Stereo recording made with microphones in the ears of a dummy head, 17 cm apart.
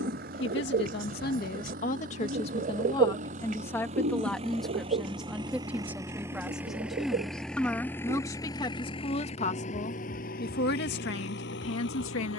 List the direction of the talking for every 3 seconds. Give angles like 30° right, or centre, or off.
40° left, centre, 10° left, 50° left.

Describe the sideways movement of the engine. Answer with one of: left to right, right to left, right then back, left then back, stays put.
right to left.